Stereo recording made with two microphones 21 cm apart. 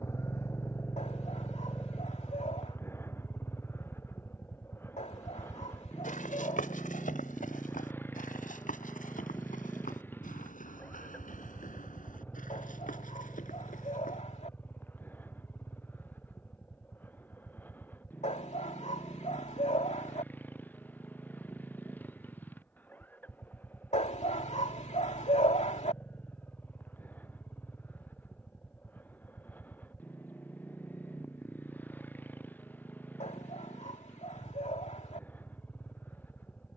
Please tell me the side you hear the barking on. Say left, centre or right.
left.